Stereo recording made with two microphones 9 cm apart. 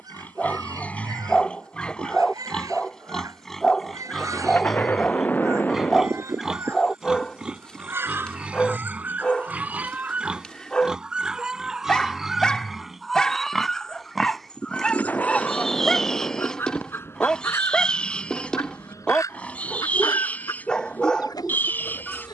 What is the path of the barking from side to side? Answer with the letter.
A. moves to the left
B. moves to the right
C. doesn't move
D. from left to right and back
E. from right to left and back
C.